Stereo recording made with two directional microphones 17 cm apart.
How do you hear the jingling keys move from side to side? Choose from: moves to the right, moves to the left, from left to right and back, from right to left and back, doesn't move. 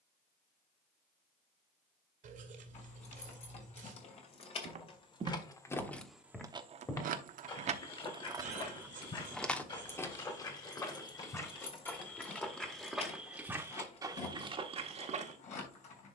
from left to right and back.